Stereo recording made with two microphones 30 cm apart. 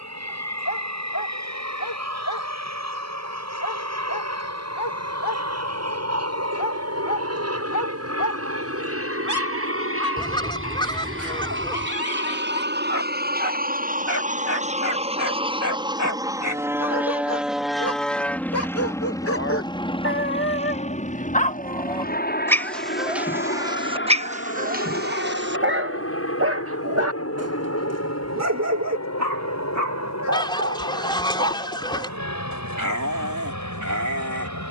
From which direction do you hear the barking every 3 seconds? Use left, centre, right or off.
left, left, left, left, left, left, left, centre, right, right, right, right.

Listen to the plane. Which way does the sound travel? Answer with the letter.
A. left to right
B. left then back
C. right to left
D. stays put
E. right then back
C.